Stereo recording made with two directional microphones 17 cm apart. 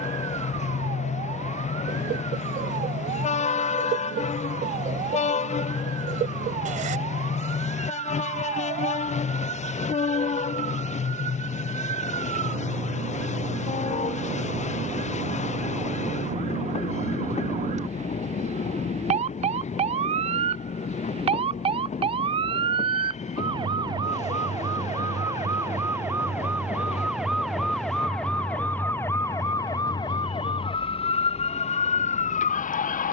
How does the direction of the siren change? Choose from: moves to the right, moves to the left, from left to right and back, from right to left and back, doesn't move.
moves to the left.